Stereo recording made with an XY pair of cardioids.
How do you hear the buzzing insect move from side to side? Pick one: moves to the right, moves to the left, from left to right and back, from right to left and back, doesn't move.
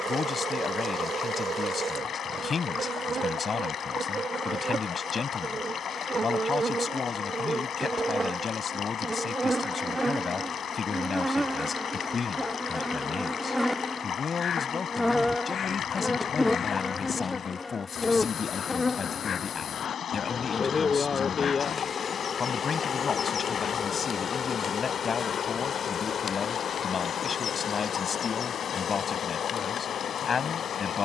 moves to the left.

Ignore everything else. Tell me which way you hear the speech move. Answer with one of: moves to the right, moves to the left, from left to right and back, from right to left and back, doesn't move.
doesn't move.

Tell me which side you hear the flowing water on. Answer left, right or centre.
left.